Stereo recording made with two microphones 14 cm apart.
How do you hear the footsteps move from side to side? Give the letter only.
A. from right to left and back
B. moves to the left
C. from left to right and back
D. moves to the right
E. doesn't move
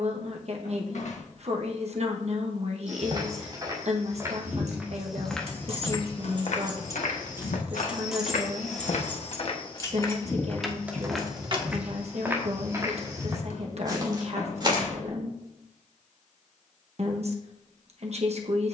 A.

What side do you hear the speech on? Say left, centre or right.
right.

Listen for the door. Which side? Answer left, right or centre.
left.